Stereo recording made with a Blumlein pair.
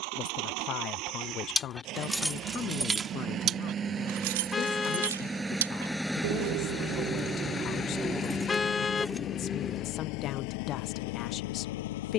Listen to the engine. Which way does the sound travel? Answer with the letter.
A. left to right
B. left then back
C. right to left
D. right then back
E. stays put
C.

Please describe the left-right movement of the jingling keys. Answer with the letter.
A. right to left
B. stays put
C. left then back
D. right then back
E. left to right
D.